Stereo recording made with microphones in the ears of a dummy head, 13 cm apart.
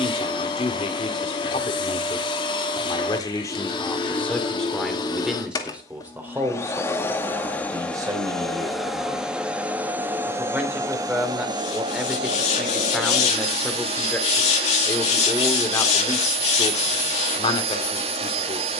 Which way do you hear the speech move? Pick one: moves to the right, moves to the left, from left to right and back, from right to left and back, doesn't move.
from left to right and back.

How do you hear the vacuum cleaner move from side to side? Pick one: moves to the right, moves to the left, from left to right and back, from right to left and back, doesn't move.
moves to the right.